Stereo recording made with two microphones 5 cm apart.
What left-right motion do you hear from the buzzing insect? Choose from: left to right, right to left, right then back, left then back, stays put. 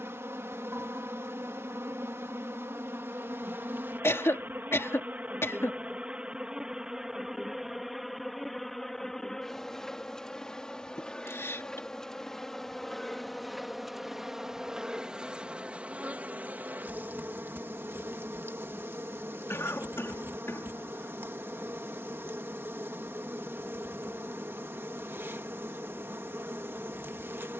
left then back.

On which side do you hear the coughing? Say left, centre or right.
left.